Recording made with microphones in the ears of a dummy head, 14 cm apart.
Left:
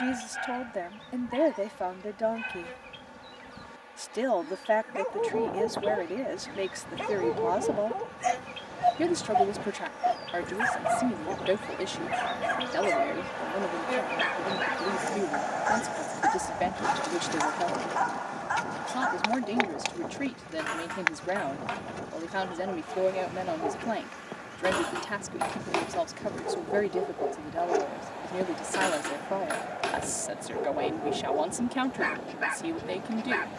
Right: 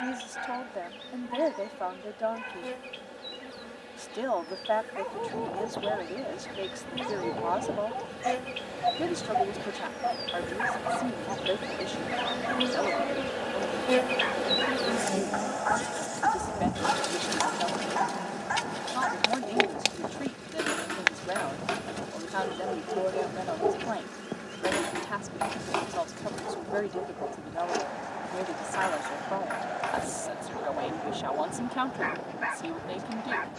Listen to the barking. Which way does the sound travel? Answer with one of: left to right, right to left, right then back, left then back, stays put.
right then back.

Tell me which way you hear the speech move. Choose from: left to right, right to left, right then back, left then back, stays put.
stays put.